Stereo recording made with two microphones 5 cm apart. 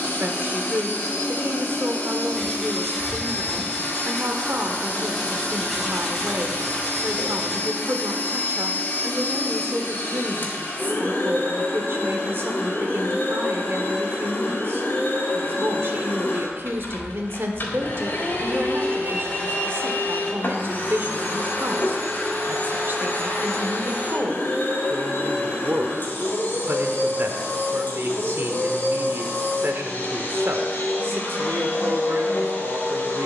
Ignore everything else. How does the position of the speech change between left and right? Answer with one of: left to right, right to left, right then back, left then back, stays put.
stays put.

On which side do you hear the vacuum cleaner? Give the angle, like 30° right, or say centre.
40° left.